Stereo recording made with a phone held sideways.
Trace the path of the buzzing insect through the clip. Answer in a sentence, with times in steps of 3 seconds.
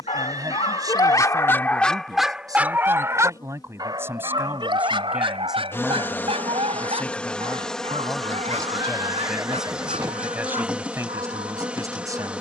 You can hear the buzzing insect on the left from 0 s and in the centre from 6 s.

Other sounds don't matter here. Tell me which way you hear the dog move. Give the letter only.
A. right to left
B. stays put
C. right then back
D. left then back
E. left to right
E.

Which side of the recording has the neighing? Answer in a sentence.
In this clip you hear the neighing on the right.